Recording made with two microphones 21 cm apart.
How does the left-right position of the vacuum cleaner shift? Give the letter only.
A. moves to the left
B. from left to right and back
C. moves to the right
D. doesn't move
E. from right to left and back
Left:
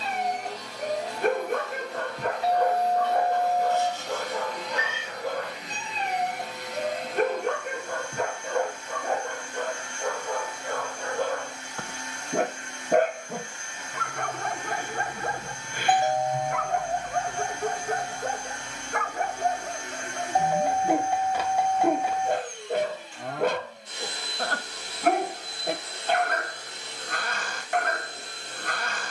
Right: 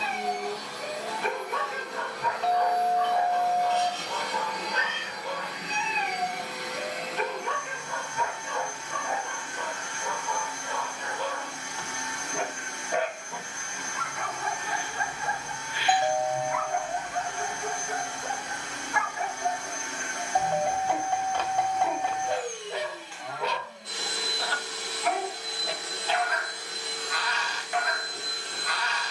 D.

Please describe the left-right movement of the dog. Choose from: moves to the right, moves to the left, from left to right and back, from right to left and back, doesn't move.
doesn't move.